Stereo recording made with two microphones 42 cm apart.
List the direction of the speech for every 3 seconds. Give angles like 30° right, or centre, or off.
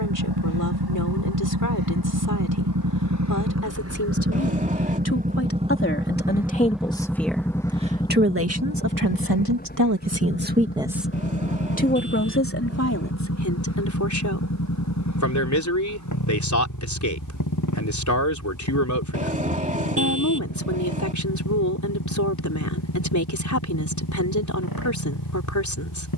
40° left, 40° left, 10° right, 30° right, 40° left, 40° left, 40° left, 40° left, 40° left.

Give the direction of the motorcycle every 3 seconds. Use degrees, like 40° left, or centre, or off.
60° right, 30° right, centre, 20° left, 30° left, 40° left, 50° left, 50° left, 50° left.